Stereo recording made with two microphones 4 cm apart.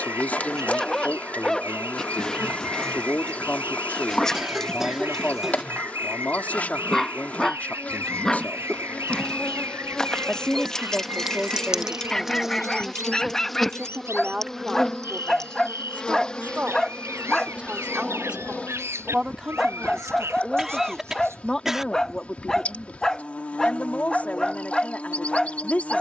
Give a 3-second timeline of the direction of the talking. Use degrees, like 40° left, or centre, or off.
30° left, 30° left, 30° left, 10° left, 20° right, 30° right, 10° right, 20° left, 30° left.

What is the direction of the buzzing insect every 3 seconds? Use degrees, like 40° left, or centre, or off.
30° left, 30° left, 30° left, 10° left, centre, 20° left, 30° left, 30° left, 30° left.